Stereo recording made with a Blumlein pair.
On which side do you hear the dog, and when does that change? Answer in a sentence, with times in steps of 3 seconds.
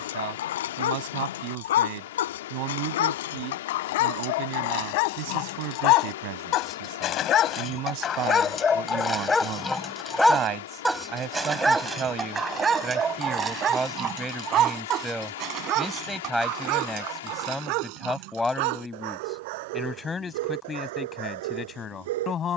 In this clip you hear the dog on the left from 0 s, in the centre from 9 s and on the right from 12 s.